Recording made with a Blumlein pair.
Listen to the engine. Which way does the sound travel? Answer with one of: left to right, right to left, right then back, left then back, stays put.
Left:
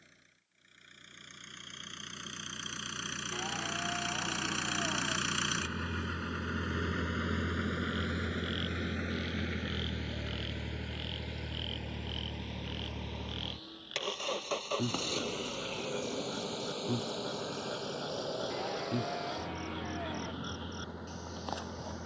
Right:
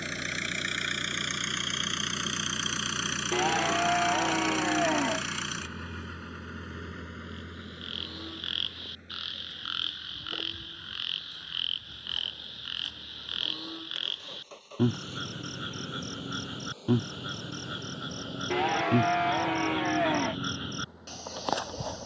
right to left.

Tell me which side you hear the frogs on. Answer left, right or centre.
right.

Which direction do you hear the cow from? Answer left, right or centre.
right.